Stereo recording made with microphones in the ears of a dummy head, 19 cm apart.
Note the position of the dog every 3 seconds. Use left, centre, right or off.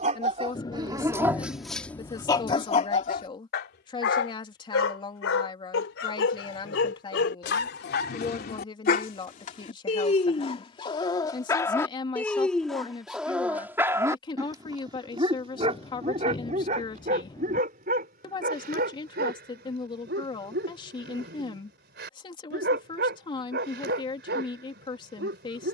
centre, left, left, left, centre, right, right, right, right.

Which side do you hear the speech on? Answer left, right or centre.
left.